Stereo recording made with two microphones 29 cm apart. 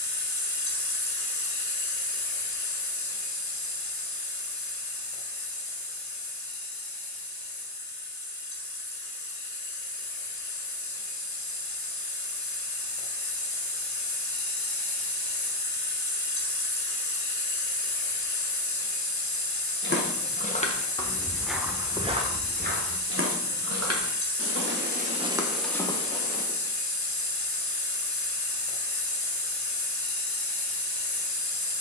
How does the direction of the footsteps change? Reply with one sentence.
In this clip you hear the footsteps move from left to right and back again.